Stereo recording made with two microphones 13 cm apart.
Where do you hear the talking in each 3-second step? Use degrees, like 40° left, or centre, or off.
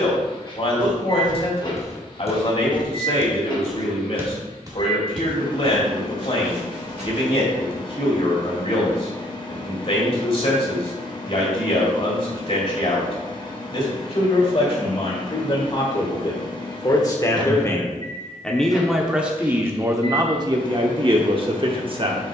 50° left, 50° left, 50° left, 50° left, 50° left, 30° left, 20° right, 40° right.